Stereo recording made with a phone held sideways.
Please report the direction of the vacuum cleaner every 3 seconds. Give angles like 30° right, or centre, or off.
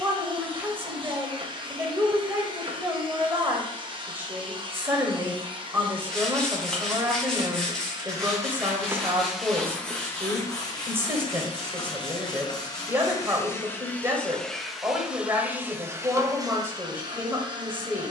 40° right, 40° right, 30° right, 20° left, 20° left, 20° right.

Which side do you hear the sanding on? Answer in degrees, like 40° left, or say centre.
centre.